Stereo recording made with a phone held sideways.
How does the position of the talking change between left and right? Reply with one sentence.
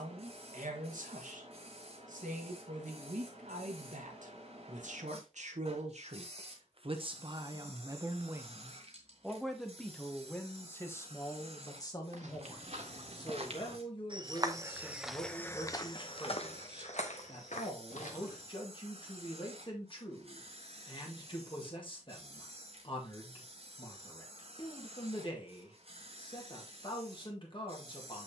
In this clip you hear the talking travel towards the left.